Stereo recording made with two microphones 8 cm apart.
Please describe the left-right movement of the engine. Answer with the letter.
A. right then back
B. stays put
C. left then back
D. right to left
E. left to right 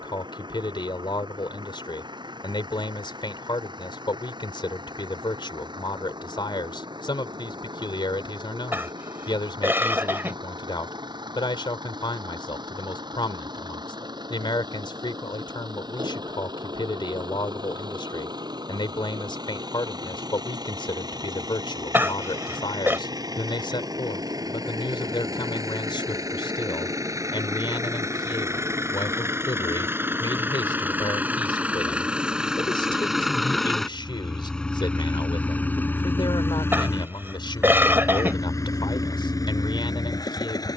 D.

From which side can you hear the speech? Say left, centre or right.
left.